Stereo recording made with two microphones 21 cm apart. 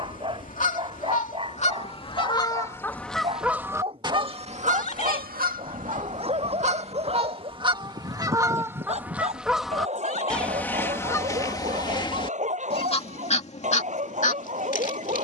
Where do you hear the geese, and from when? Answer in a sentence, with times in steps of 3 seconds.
In this clip you hear the geese on the left from 0 s, on the right from 3 s, in the centre from 9 s and on the left from 12 s.